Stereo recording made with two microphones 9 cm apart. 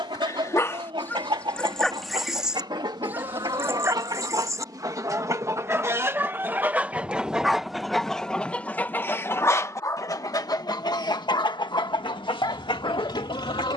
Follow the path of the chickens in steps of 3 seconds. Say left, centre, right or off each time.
right, right, centre, left, left.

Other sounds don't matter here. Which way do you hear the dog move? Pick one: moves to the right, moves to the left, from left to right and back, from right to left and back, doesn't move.
from left to right and back.